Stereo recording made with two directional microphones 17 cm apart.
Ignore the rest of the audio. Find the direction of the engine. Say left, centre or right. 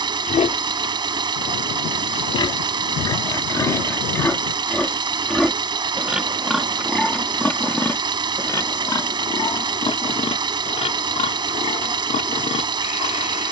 right.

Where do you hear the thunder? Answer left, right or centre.
left.